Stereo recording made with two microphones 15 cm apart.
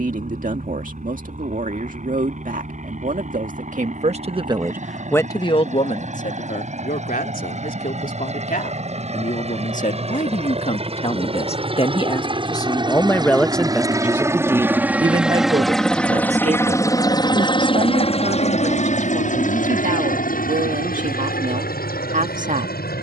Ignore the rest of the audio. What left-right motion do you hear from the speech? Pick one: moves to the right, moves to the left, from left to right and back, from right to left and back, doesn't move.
from right to left and back.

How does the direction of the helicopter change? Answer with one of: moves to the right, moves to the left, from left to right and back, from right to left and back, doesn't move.
moves to the left.